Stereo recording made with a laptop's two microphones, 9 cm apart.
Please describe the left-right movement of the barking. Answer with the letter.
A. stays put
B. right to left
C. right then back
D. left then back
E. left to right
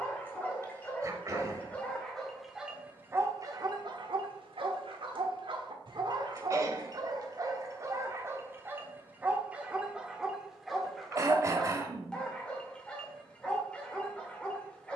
C.